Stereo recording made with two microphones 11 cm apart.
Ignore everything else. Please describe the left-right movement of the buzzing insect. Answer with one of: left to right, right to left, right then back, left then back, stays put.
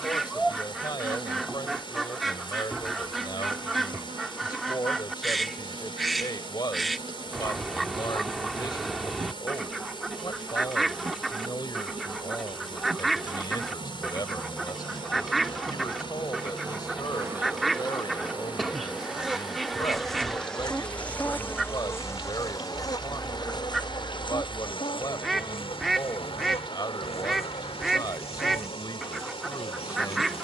right to left.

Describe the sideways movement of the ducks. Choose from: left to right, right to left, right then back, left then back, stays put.
stays put.